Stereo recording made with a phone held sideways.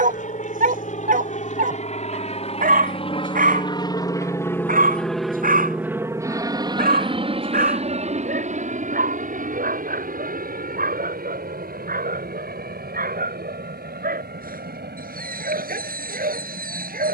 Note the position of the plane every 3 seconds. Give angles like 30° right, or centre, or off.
60° left, 20° left, 40° right, 60° right, 70° right, 70° right.